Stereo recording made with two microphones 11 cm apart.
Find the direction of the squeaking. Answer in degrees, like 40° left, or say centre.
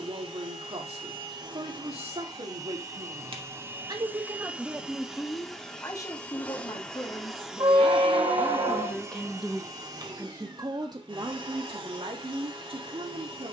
50° right.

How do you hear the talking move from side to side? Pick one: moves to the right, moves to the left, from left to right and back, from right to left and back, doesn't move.
from right to left and back.